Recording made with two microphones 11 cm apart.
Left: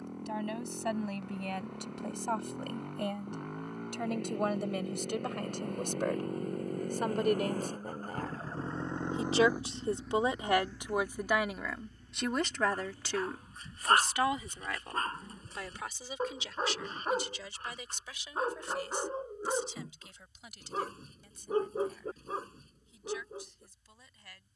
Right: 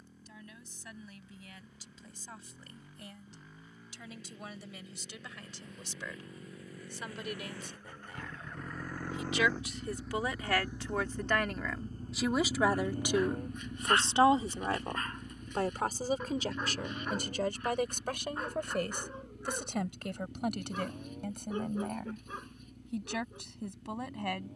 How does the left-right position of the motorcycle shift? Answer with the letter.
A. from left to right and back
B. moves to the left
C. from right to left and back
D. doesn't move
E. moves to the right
E.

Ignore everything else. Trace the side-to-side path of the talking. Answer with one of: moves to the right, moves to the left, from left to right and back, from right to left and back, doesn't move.
moves to the right.